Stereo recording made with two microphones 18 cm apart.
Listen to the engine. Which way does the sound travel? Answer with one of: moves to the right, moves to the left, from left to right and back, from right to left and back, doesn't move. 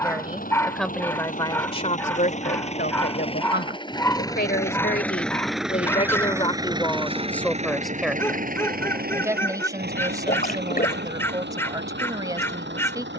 moves to the right.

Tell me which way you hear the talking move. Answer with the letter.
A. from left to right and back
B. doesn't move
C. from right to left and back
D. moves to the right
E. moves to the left
C.